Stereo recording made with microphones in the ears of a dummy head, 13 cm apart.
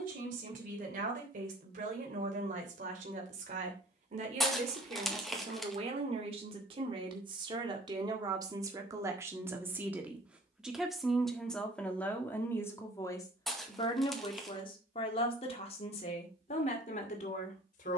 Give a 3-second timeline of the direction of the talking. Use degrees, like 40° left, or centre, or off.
60° right, 50° right, 30° right, 10° right, 20° left, 50° left.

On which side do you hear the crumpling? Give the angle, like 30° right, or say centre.
centre.